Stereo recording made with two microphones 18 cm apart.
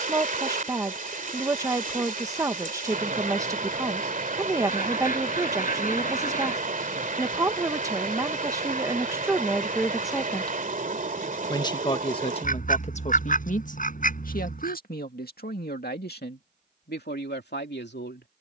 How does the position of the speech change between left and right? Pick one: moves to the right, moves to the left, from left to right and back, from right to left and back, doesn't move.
moves to the left.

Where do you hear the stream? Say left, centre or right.
right.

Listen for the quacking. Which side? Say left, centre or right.
left.